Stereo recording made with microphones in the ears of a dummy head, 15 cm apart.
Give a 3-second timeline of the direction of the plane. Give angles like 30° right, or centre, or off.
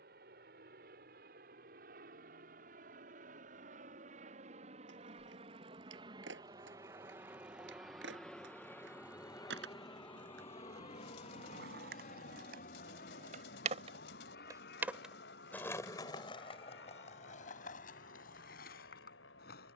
60° right, 40° right, 10° right, 30° left, 60° left, 70° left, 70° left.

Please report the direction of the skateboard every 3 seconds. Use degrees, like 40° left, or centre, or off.
off, 80° right, 80° right, 70° right, 40° right, 40° left, 60° left.